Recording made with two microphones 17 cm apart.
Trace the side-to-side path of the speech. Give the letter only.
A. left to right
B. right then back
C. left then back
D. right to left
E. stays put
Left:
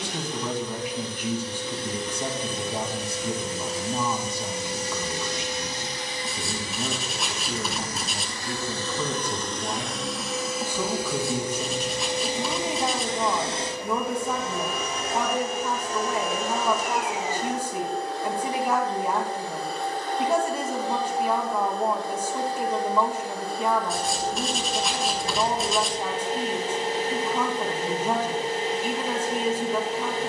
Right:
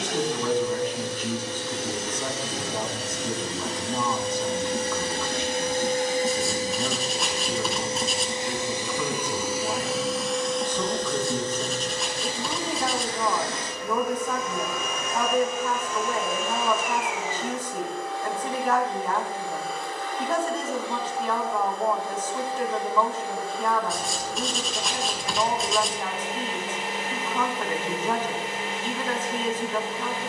E.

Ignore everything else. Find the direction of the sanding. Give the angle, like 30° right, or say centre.
centre.